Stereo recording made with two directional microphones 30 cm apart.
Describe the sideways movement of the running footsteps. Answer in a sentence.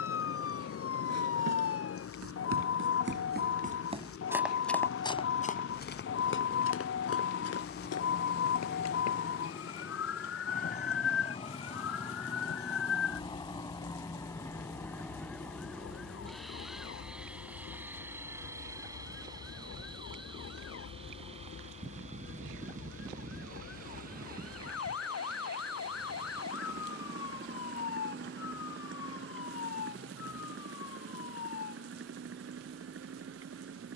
In this clip you hear the running footsteps go from the right side to the left.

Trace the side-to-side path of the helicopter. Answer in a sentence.
In this clip you hear the helicopter move to the right.